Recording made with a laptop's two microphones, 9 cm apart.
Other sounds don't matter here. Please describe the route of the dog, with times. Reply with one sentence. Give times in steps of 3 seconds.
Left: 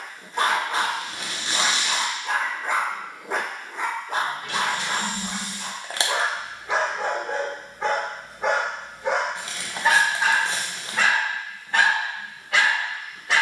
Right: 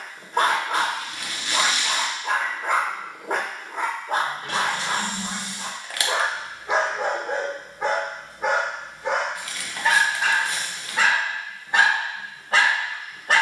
In this clip you hear the dog on the right from 0 s, in the centre from 6 s and on the right from 12 s.